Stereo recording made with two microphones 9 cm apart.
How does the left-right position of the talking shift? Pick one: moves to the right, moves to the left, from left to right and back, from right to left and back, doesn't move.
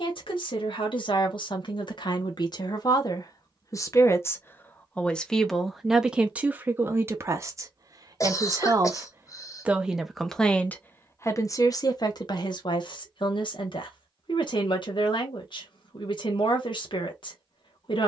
from left to right and back.